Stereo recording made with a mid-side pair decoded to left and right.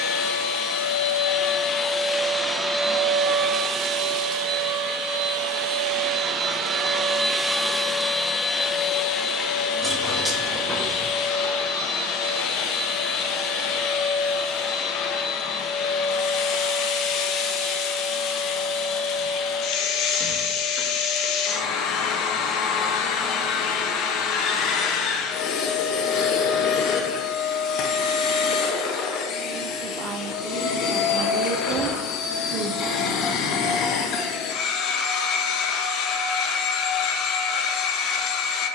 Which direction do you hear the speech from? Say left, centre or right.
right.